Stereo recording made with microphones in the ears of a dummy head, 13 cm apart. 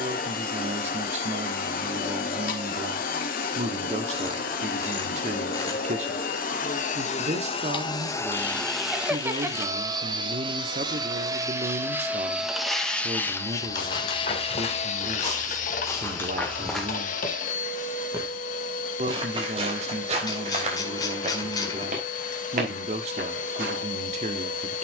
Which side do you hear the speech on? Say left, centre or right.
right.